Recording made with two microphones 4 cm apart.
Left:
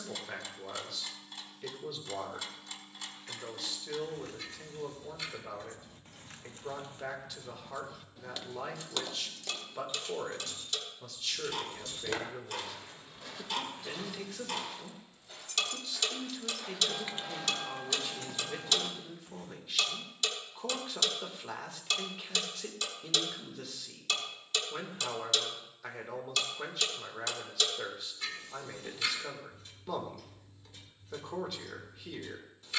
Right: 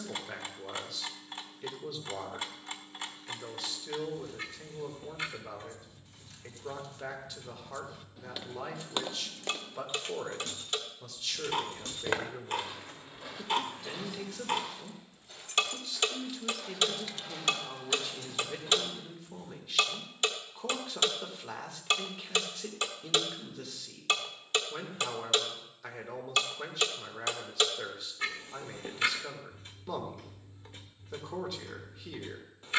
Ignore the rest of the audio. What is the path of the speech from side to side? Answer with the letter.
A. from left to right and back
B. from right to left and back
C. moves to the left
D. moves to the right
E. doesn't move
E.